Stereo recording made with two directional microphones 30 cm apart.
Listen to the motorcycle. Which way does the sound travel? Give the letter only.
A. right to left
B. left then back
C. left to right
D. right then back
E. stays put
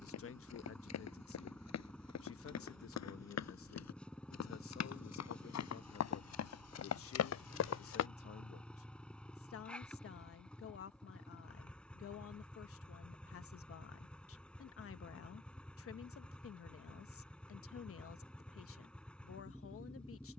E.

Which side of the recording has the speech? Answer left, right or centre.
left.